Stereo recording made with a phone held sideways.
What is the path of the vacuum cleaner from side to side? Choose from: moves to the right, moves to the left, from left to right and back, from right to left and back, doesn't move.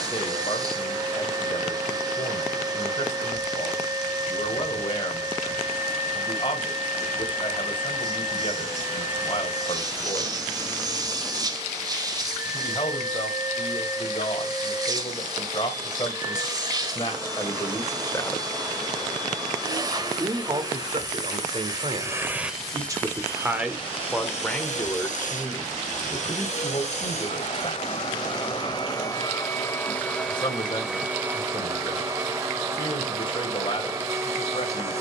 from right to left and back.